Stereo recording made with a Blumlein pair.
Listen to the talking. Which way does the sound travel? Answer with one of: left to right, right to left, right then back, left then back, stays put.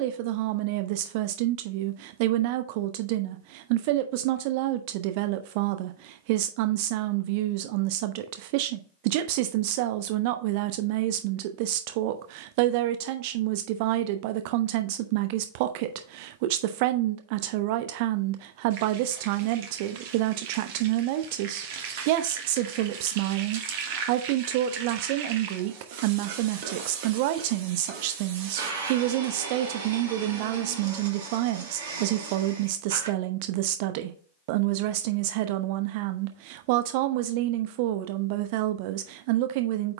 stays put.